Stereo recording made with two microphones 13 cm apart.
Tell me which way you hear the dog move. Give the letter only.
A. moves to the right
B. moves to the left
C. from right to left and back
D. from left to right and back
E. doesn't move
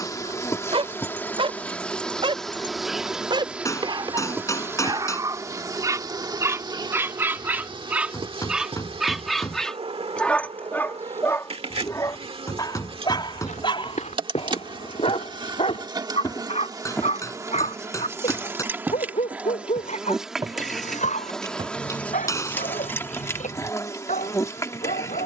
B.